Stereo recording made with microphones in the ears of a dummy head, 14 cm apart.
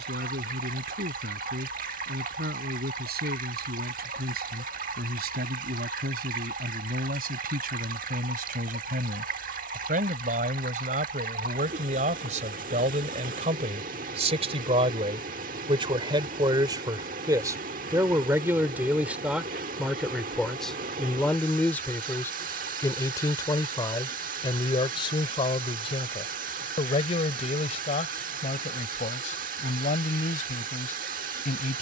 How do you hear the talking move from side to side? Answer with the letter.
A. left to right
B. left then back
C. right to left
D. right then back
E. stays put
C.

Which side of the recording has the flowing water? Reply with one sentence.
You can hear the flowing water on the right.